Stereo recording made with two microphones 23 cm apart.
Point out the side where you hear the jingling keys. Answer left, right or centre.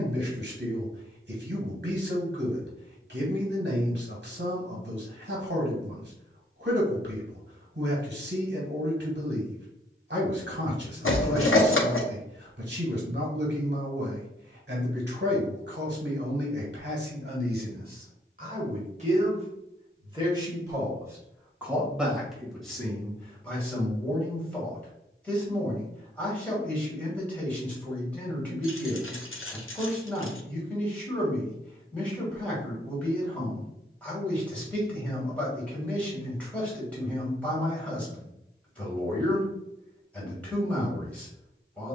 left.